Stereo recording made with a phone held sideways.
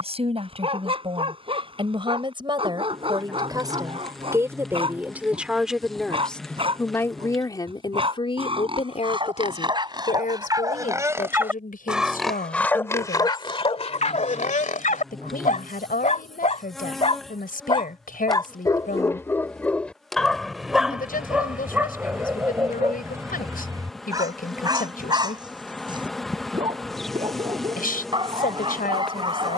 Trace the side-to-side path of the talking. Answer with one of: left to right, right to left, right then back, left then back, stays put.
right to left.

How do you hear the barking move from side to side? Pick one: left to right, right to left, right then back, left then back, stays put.
left then back.